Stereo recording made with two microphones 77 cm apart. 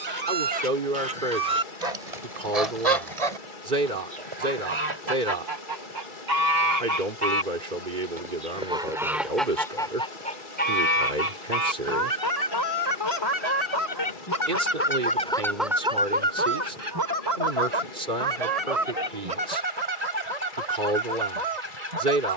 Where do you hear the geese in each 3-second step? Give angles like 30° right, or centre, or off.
50° right, 40° right, 20° right, 10° left, 30° left, 10° right, 50° right, 50° right.